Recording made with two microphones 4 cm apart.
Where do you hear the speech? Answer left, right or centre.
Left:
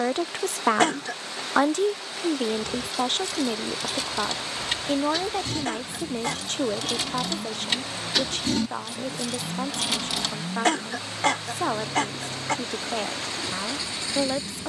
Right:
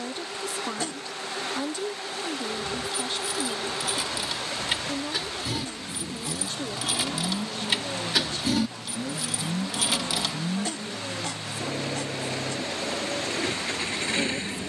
left.